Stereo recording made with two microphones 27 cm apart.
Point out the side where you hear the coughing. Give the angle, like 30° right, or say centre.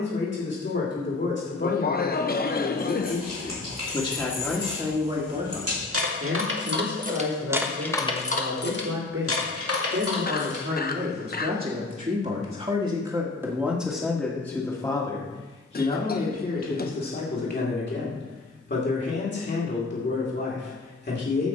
40° left.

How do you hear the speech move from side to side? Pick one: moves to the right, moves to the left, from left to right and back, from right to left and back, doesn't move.
from left to right and back.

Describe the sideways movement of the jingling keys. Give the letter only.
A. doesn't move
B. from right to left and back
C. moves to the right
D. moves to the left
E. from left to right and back
D.